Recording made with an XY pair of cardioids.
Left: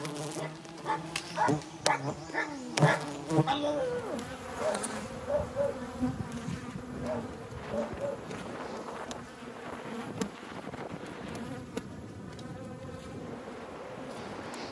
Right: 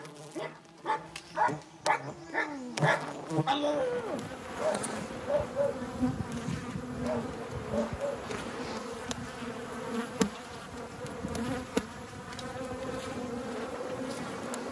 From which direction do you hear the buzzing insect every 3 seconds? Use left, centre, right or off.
left, centre, right, right, right.